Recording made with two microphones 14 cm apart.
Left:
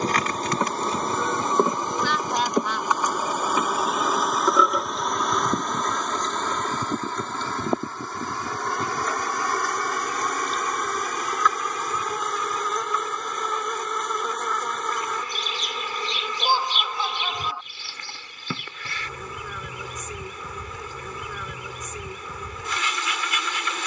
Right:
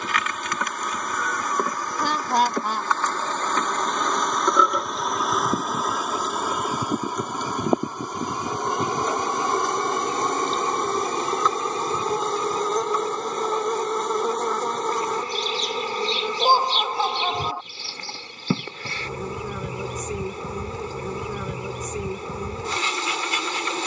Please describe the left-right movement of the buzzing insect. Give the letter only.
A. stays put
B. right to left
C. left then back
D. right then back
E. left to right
E.